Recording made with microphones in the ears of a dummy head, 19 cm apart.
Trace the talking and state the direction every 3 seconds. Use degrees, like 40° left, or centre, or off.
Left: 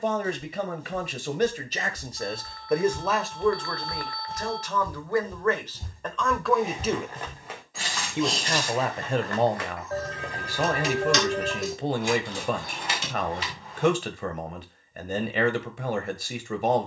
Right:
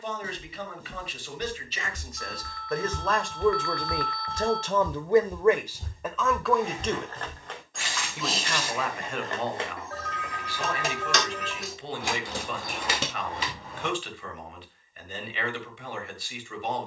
30° left, 10° right, 10° left, 40° left, 40° left, 40° left.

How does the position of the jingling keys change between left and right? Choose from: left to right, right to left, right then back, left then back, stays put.
left to right.